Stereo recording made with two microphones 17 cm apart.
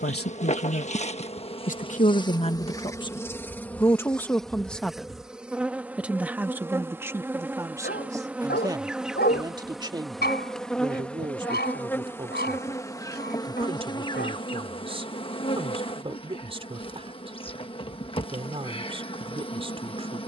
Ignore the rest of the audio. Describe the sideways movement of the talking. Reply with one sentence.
You can hear the talking travel towards the right.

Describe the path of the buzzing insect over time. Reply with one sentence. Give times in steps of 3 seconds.
In this clip you hear the buzzing insect on the left from 0 s, in the centre from 3 s and on the left from 12 s.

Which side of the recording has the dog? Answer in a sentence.
You can hear the dog on the left.